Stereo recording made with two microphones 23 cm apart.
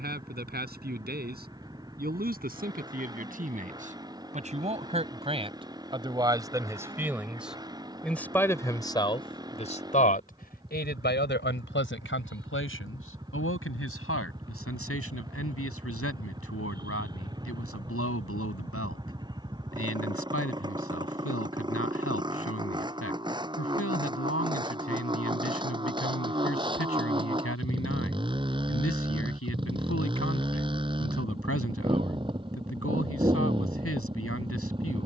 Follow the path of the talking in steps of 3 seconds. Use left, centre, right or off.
right, right, centre, left, left, left, left, left, left, left, left, left.